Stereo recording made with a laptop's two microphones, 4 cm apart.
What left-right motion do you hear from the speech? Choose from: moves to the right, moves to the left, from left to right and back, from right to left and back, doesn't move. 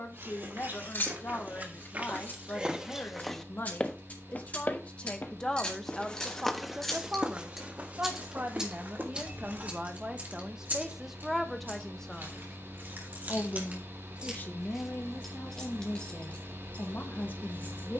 from left to right and back.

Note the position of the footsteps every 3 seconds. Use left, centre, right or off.
right, left, right, right, off, off.